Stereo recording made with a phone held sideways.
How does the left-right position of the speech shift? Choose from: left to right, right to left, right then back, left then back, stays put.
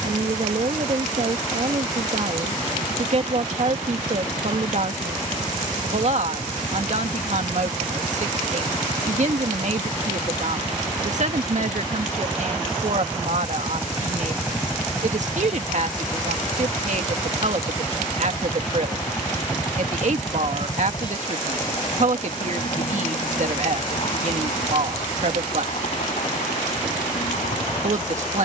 stays put.